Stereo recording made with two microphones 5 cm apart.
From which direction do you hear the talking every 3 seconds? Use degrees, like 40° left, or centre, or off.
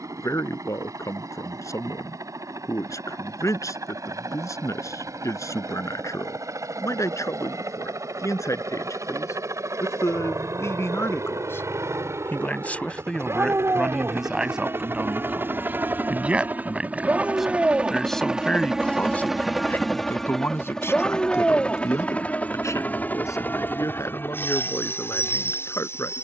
70° left, 70° left, 70° left, 60° left, 10° left, 20° right, 30° left, 60° left, 70° left.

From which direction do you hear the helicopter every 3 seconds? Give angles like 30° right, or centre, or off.
80° right, 70° right, 70° right, 60° right, 50° right, 30° right, centre, 20° left, 40° left.